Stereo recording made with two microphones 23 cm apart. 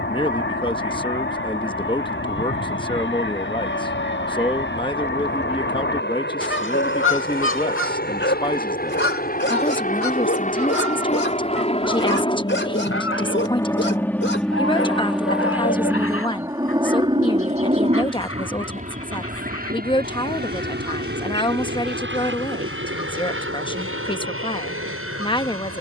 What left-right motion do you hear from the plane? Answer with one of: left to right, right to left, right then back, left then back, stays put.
left to right.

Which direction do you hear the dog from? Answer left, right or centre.
left.